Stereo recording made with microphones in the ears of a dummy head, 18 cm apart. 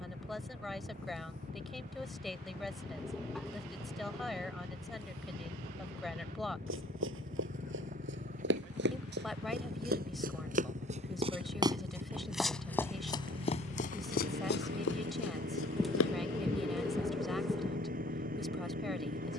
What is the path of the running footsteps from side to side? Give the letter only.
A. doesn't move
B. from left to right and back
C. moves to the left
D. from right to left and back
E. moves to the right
C.